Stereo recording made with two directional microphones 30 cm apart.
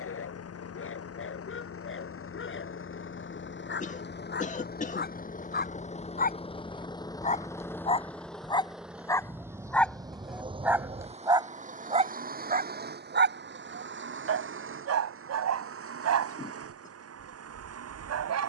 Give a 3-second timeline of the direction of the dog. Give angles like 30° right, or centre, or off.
40° left, 30° left, 20° left, centre, 40° right, 60° right.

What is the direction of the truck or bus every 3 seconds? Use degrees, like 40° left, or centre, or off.
50° left, 30° left, 10° left, 20° right, 40° right, 50° right.